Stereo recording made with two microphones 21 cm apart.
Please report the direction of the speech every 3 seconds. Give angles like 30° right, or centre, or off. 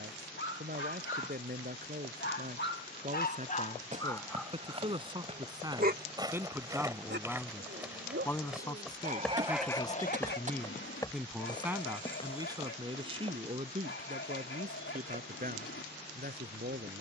50° right, 30° right, centre, 10° left, 30° right, 50° right.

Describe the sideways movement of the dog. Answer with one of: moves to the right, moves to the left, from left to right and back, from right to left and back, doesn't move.
from left to right and back.